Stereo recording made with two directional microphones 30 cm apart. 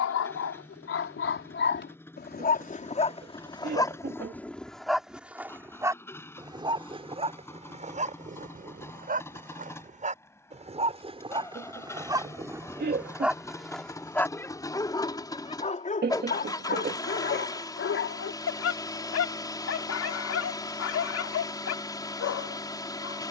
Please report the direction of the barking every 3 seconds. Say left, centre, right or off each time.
left, centre, right, right, centre, left, left, left.